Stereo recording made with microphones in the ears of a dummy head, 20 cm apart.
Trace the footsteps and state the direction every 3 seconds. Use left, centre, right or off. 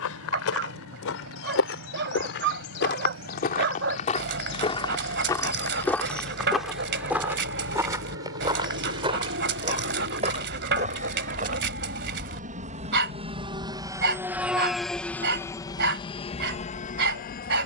left, left, centre, right, off, off.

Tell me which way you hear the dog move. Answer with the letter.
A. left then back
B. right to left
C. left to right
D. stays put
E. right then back
D.